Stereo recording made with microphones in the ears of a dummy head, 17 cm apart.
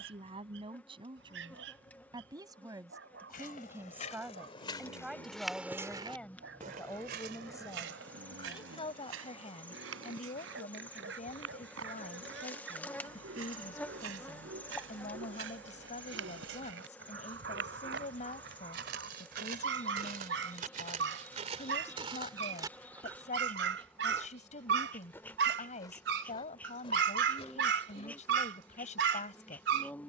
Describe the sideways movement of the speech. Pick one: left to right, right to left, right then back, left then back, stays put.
right to left.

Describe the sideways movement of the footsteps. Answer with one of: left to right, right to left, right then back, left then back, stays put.
right then back.